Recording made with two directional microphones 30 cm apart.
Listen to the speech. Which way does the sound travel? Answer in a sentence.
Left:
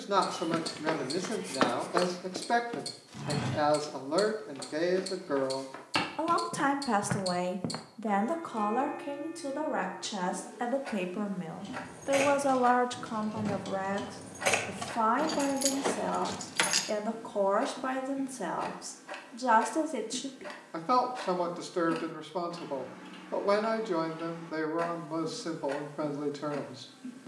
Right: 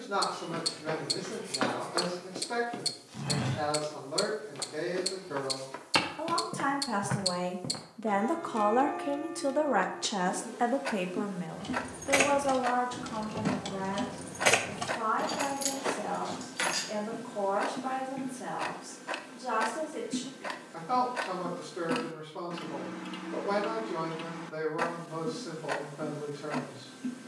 In this clip you hear the speech move from left to right and back again.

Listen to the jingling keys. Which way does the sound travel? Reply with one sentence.
In this clip you hear the jingling keys move to the left.